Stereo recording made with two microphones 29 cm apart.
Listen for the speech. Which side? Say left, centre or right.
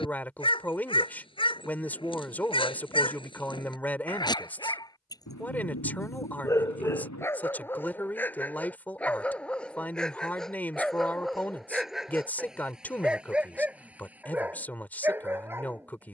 centre.